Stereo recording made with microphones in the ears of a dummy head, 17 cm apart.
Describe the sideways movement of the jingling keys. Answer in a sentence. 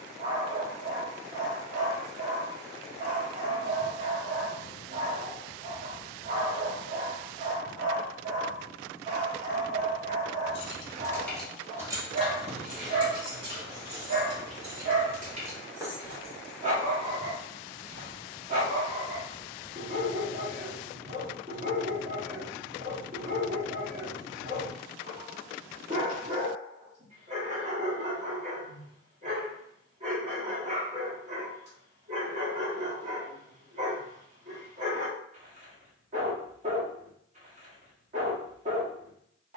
In this clip you hear the jingling keys go right and come back.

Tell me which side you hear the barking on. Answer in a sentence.
You can hear the barking on the right.